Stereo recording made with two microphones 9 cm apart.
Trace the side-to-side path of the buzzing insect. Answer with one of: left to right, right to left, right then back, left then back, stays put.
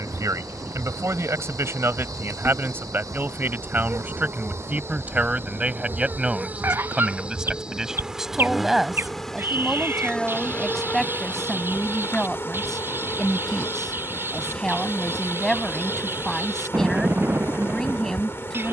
right to left.